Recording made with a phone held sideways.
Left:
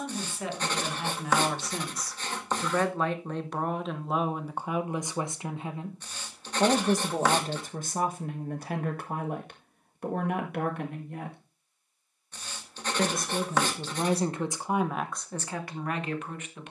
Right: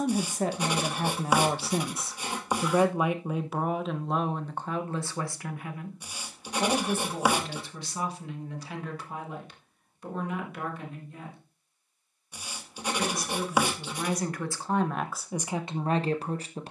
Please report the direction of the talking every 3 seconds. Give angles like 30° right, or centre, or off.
30° right, 10° left, 40° left, 60° left, 30° left, 20° right.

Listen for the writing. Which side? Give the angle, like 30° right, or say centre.
10° right.